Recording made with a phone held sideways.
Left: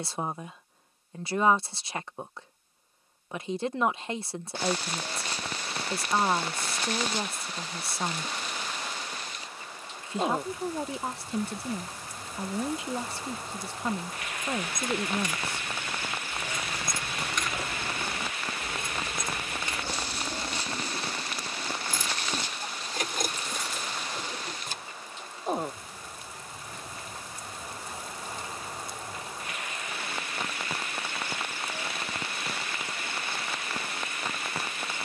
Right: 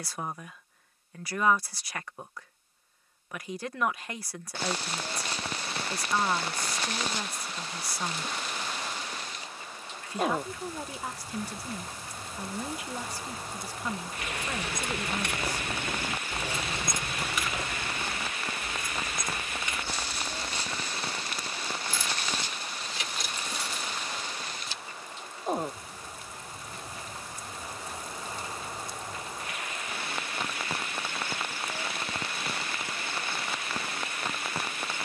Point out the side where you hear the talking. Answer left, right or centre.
left.